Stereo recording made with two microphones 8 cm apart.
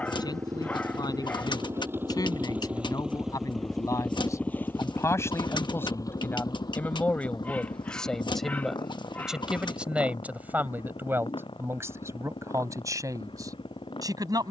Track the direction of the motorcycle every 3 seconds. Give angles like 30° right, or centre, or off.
30° right, 20° left, 60° left, 70° left, 80° left.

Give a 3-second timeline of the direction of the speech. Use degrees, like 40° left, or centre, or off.
50° left, 40° left, 10° left, 20° right, 40° right.